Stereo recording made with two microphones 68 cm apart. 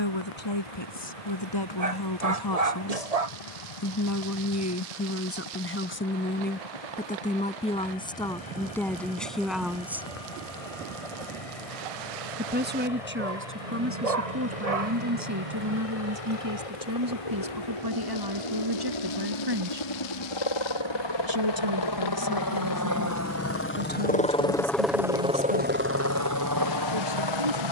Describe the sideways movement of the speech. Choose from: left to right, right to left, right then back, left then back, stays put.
left to right.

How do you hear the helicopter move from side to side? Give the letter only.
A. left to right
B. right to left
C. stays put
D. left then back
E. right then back
A.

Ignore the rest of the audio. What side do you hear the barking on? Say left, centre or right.
right.